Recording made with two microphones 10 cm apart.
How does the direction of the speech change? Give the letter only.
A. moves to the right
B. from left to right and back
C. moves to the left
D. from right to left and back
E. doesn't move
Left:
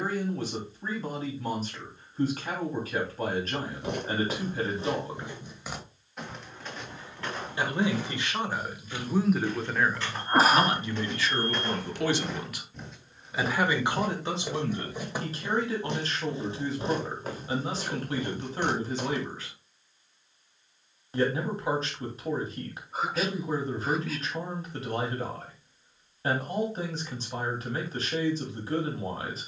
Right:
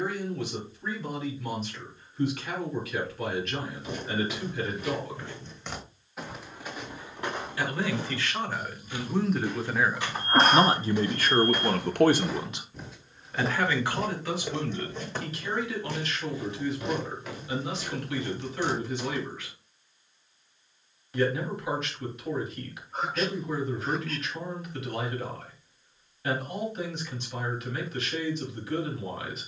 B.